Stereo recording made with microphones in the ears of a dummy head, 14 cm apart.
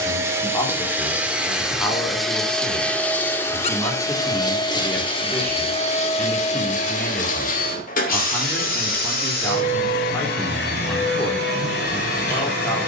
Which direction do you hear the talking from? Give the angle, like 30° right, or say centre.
10° left.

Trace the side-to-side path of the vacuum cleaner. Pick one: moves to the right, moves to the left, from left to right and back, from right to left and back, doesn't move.
moves to the left.